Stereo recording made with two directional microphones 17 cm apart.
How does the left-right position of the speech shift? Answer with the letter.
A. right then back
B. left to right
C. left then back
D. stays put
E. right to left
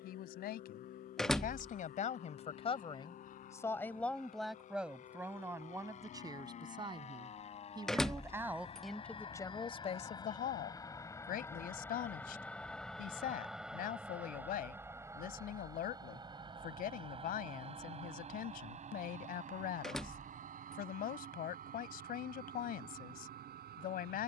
A.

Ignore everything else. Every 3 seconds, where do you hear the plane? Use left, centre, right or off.
left, left, left, left, centre, right, right, right.